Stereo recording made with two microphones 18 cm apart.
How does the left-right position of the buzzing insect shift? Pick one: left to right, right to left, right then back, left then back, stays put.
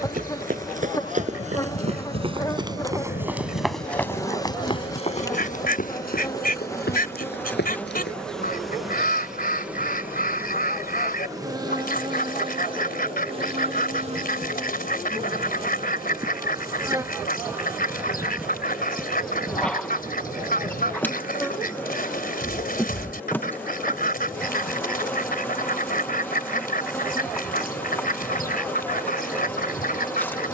right then back.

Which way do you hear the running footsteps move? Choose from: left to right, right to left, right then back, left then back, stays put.
right to left.